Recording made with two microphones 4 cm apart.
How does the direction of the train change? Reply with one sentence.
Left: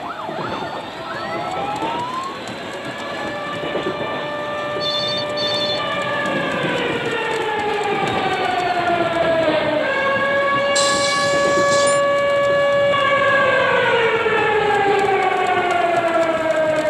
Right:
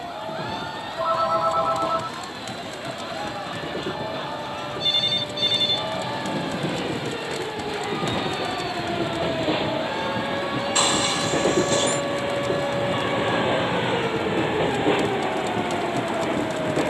You can hear the train move from left to right.